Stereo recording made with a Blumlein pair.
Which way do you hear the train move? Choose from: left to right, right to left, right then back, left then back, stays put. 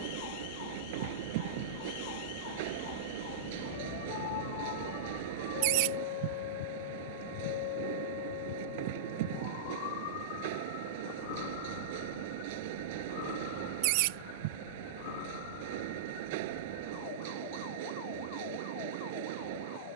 stays put.